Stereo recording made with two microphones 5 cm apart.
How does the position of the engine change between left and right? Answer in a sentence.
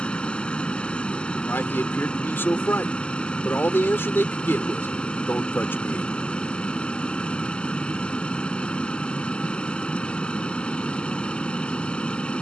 You can hear the engine stay in one place.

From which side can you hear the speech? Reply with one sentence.
You can hear the speech on the left.